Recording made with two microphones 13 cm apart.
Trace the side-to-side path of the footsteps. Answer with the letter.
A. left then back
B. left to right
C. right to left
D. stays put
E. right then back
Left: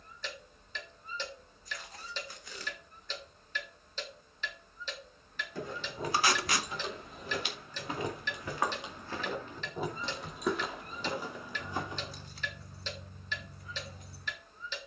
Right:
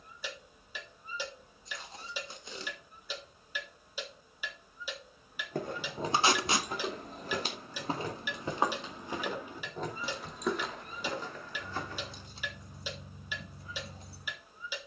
C.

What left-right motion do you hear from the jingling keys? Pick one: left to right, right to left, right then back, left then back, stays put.
left then back.